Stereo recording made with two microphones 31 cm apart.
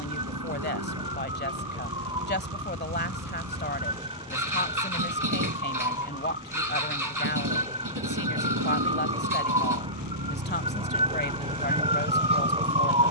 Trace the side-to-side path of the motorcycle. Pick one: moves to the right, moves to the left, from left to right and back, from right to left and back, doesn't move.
doesn't move.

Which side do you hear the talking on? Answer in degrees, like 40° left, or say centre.
30° left.